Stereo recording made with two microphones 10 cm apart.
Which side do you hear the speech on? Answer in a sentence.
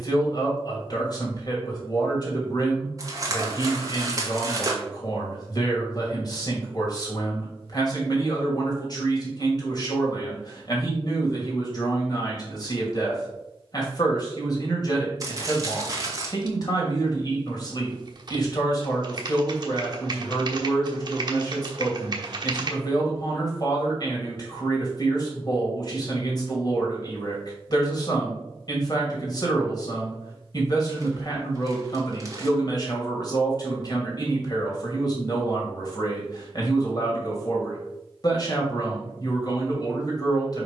In this clip you hear the speech on the left.